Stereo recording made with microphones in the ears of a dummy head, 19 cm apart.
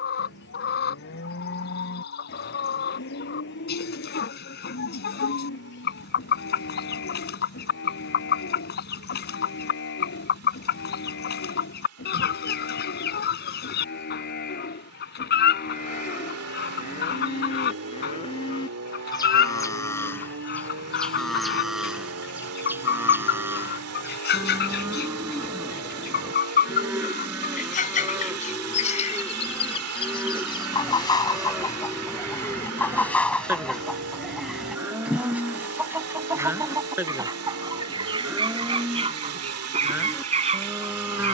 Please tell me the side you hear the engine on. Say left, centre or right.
right.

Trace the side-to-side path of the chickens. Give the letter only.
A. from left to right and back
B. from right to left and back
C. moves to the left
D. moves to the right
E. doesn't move
D.